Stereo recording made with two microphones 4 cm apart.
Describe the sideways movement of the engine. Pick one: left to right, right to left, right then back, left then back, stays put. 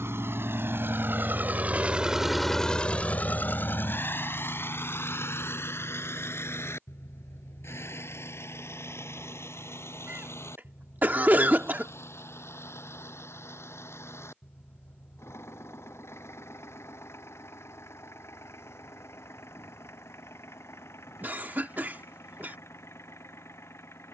right to left.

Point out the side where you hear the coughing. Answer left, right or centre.
right.